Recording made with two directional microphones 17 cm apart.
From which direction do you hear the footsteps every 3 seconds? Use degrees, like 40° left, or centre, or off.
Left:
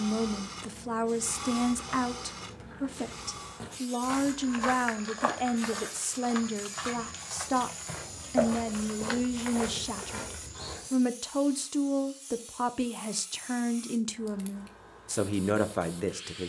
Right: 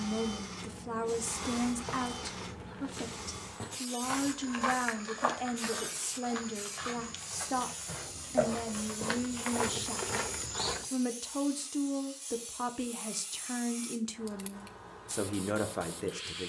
40° right, 10° left, 30° left, 30° right, off, off.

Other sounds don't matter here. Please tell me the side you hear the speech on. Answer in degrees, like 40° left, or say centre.
20° left.